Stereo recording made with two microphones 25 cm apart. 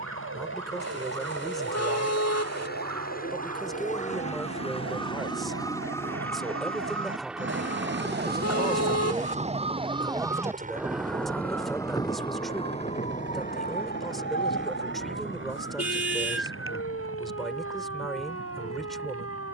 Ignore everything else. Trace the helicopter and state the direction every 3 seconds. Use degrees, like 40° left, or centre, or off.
50° left, 20° left, centre, 30° right, 40° right, 50° right, 60° right.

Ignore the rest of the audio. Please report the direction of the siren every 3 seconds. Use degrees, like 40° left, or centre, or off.
80° right, 70° right, 50° right, 10° right, 30° left, 50° left, 60° left.